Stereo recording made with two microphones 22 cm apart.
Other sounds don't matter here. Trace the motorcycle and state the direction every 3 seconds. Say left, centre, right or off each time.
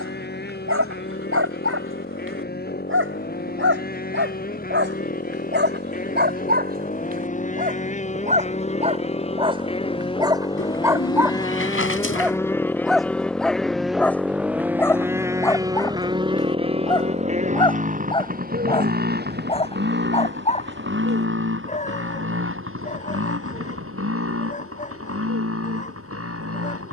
left, left, left, left, centre, right, right, right, right.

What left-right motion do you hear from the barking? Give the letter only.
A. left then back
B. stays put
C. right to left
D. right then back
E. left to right
C.